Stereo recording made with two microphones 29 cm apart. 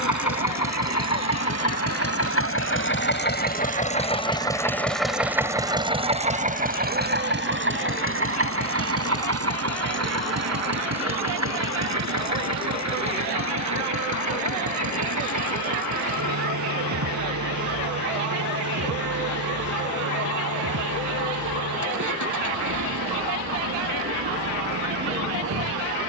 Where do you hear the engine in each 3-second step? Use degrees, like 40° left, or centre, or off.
50° left, 10° left, 40° right, 60° right, 70° right, 70° right, 70° right, 70° right, 70° right.